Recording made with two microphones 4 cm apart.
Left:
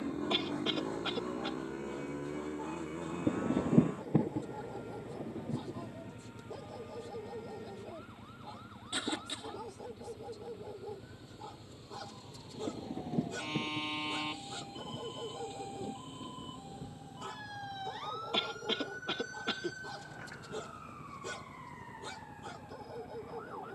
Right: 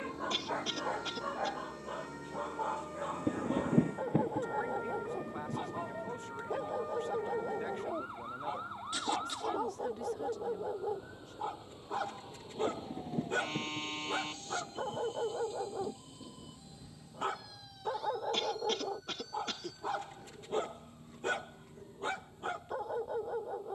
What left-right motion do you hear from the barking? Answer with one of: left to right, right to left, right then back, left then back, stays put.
stays put.